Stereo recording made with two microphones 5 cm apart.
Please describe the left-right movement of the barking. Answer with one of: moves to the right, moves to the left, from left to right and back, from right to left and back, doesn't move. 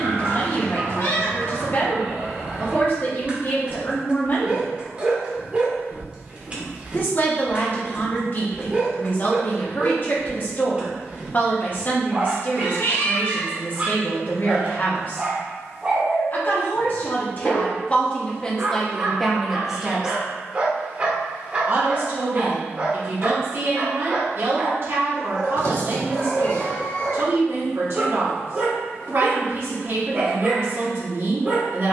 doesn't move.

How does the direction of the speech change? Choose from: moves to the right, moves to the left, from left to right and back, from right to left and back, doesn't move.
moves to the right.